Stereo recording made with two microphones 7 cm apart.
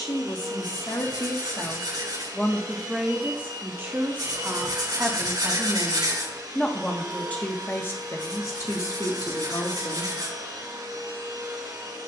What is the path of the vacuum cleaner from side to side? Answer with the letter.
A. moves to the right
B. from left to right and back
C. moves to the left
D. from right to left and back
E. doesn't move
E.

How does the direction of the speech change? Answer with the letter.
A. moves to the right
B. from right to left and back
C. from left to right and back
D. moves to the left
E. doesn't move
C.